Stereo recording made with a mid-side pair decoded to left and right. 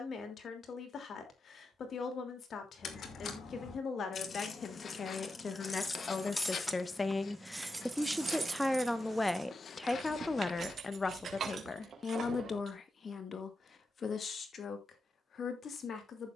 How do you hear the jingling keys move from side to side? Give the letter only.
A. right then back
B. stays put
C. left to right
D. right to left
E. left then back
C.